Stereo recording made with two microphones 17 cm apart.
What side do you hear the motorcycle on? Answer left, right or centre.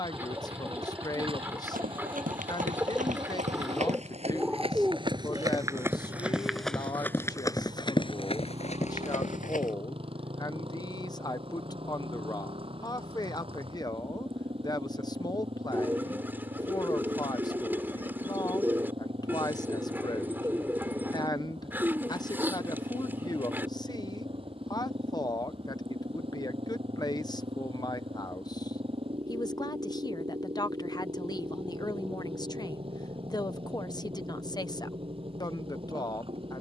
right.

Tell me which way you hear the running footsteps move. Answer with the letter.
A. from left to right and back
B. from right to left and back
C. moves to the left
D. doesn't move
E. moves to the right
C.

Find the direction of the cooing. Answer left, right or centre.
centre.